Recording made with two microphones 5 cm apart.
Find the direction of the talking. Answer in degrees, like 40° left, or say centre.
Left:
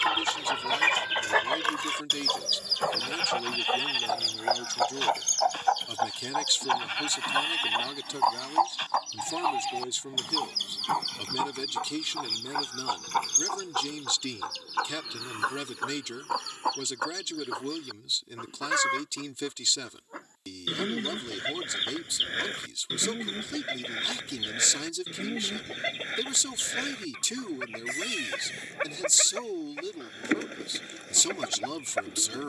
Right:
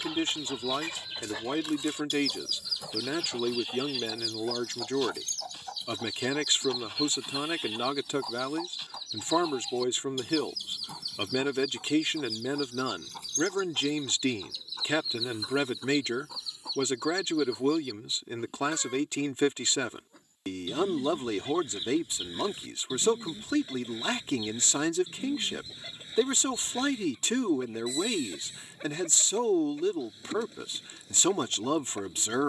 40° right.